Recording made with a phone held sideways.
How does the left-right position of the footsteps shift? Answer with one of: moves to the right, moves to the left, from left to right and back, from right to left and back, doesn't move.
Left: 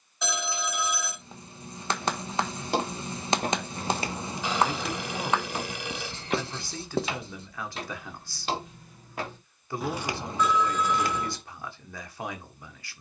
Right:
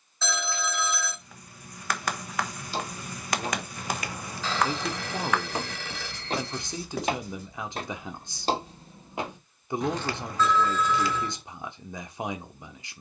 from left to right and back.